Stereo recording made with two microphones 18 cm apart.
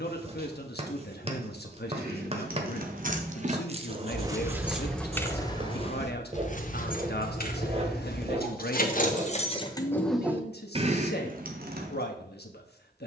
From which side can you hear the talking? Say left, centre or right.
left.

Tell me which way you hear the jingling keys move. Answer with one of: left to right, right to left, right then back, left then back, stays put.
left then back.